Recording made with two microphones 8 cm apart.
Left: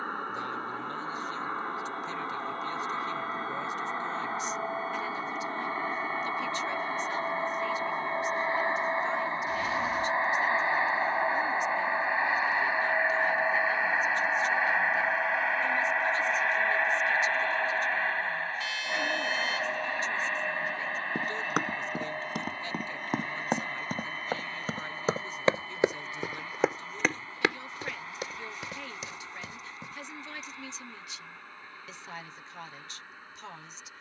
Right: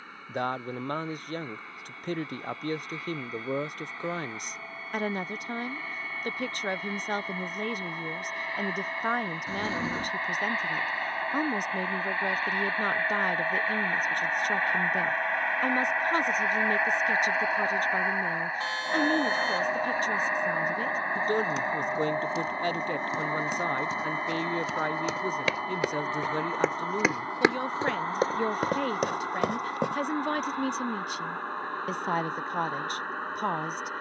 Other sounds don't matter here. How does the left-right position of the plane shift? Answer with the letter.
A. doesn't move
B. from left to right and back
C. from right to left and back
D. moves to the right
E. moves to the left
D.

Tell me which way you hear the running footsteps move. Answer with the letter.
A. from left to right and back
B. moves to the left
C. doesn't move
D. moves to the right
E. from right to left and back
D.